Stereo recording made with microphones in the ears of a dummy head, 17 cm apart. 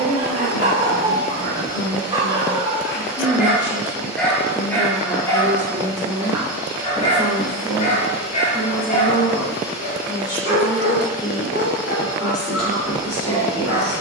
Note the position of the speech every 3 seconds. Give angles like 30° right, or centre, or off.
30° left, 10° left, centre, 20° left, 30° left.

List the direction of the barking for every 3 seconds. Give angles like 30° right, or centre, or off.
30° right, 10° left, 40° left, 60° left, 60° left.